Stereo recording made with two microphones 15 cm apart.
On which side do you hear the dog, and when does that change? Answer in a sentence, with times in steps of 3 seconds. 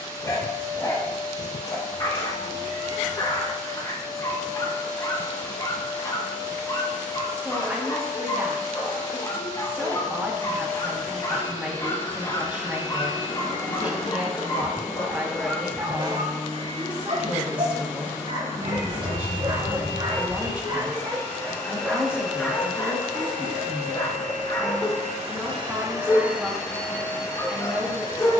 In this clip you hear the dog on the left from 0 s, on the right from 15 s, in the centre from 21 s and on the left from 24 s.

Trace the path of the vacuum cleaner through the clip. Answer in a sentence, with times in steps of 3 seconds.
In this clip you hear the vacuum cleaner on the left from 0 s, in the centre from 21 s, on the right from 24 s and on the left from 27 s.